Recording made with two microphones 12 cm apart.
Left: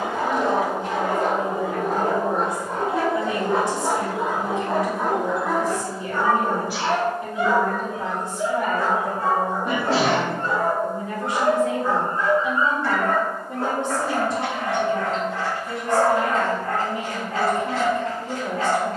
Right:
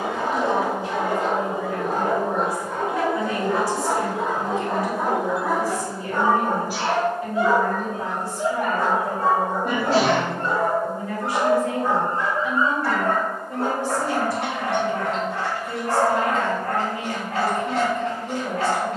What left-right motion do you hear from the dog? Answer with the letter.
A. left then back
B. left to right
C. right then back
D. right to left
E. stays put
B.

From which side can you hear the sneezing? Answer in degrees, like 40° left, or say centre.
40° right.